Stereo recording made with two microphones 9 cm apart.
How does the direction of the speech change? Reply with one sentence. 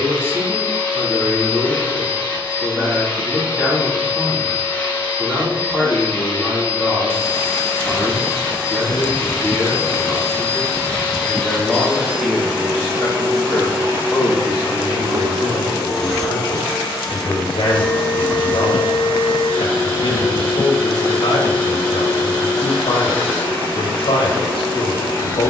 In this clip you hear the speech go from the right side to the left.